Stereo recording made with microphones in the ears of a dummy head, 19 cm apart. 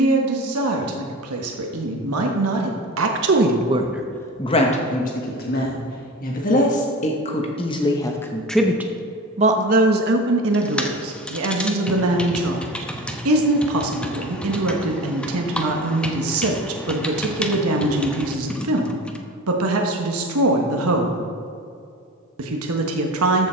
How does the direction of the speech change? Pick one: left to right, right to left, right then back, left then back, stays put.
left then back.